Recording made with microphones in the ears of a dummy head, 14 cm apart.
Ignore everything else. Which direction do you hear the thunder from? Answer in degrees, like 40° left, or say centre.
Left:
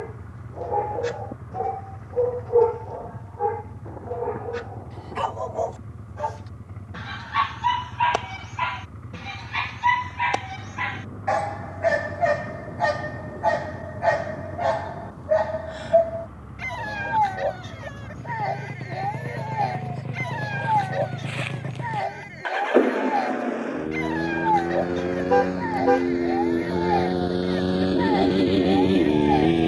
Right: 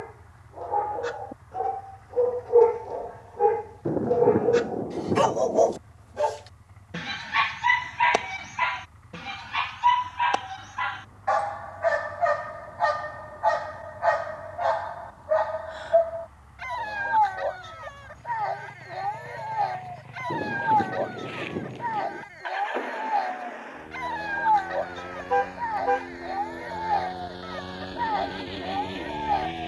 50° right.